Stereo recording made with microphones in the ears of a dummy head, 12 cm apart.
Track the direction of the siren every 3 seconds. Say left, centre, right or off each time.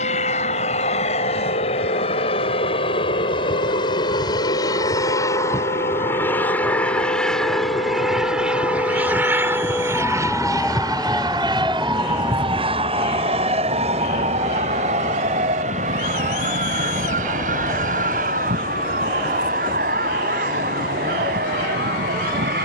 left, left, left, centre, right, right, right, right.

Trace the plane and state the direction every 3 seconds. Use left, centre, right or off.
left, left, centre, right, right, right, right, right.